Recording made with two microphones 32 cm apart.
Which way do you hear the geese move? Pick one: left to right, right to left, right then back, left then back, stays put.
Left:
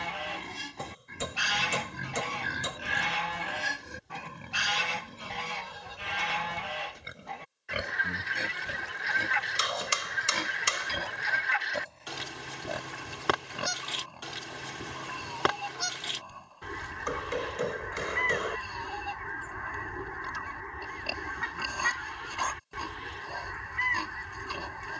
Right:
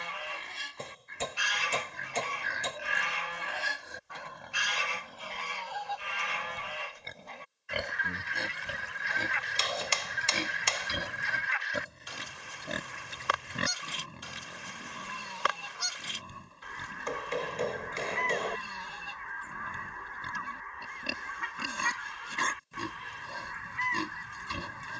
stays put.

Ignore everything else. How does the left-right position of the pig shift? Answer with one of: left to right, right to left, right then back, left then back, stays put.
left to right.